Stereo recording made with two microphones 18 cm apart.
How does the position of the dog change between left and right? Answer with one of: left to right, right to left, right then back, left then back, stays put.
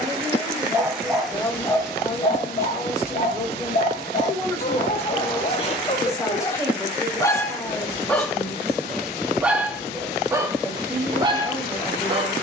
left then back.